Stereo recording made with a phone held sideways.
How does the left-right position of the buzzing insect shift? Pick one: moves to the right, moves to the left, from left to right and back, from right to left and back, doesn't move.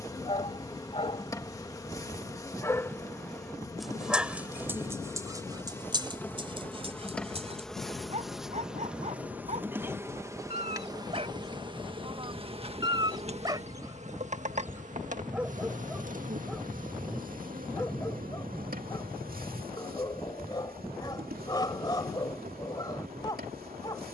moves to the right.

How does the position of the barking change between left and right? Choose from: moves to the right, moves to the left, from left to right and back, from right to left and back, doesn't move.
from left to right and back.